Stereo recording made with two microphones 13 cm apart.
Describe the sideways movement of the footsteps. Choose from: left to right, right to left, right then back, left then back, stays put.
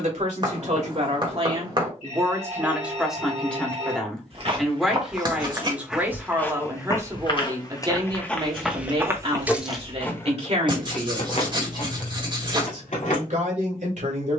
left then back.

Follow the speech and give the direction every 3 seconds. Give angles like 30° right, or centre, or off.
40° right, centre, 30° right, 50° right, 70° right.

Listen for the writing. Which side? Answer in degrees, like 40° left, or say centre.
30° right.